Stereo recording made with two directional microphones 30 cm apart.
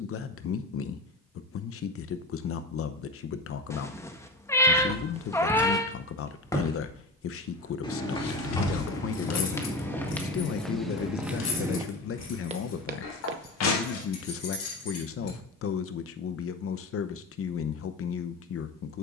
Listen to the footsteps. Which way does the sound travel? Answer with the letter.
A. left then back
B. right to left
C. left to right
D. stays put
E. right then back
A.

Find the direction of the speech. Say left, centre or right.
left.